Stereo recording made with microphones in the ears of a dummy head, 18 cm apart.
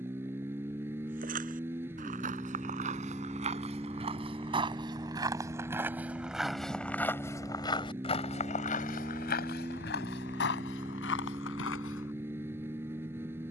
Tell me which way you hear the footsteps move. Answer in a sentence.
You can hear the footsteps move to the left.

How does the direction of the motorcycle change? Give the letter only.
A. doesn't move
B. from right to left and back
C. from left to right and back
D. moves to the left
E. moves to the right
A.